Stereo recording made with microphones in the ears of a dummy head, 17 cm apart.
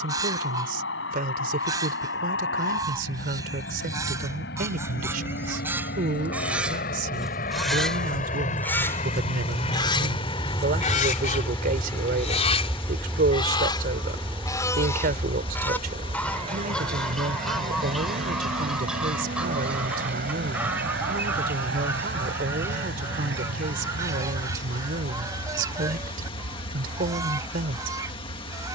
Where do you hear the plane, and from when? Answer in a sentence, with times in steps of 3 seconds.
In this clip you hear the plane on the left from 0 s, in the centre from 12 s and on the right from 15 s.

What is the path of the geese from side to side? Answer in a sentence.
You can hear the geese move from right to left and back again.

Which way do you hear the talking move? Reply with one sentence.
In this clip you hear the talking stay in one place.